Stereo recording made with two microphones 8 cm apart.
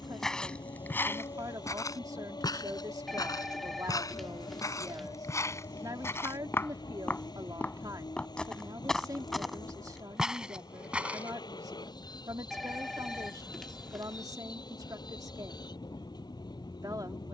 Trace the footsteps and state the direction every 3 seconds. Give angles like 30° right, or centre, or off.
30° left, 40° left, 20° left, 10° right, off, off.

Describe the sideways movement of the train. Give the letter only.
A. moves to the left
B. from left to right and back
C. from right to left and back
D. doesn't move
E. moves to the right
D.